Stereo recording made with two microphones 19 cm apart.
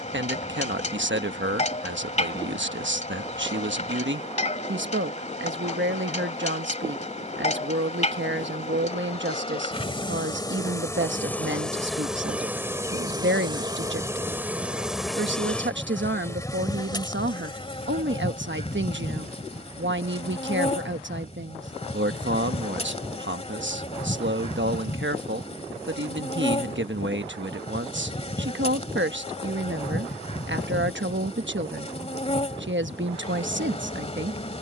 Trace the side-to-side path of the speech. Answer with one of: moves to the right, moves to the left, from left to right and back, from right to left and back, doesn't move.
doesn't move.